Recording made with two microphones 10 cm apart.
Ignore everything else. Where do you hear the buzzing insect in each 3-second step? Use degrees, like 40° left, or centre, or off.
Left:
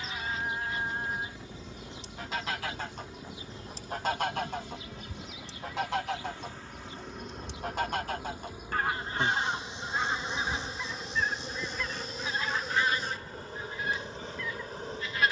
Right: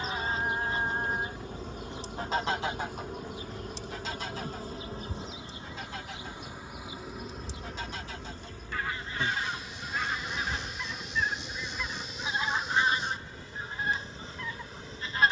50° right, 40° right, centre, 30° left, 50° left.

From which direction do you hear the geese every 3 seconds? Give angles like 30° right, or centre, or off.
30° right, 60° left, 60° left, 10° left, 30° right.